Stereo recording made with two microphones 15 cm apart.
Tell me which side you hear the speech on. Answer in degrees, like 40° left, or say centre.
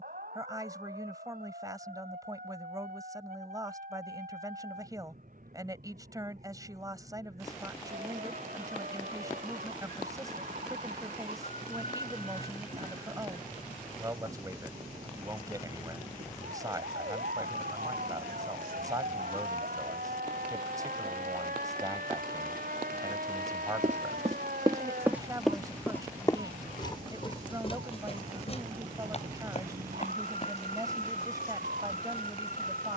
20° right.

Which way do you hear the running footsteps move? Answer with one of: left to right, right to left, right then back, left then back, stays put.
right to left.